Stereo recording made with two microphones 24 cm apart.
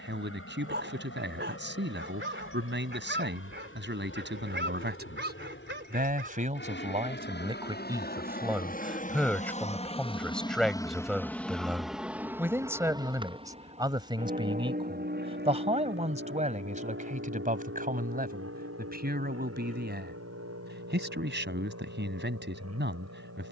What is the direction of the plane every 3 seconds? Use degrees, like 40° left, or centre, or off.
70° left, 60° left, 50° left, 20° left, 20° right, 50° right, 60° right, 70° right.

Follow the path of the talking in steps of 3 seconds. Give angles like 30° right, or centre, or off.
50° right, 50° right, 20° right, centre, 20° right, 30° right, 40° right, 50° right.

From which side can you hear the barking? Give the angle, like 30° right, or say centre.
50° right.